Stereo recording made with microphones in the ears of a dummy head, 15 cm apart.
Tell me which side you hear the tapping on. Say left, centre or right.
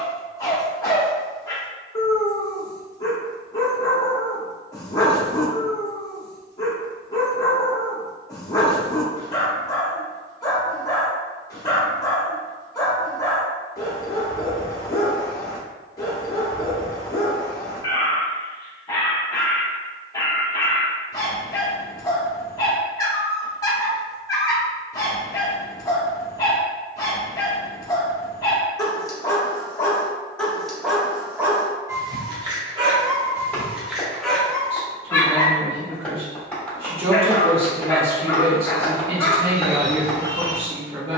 centre.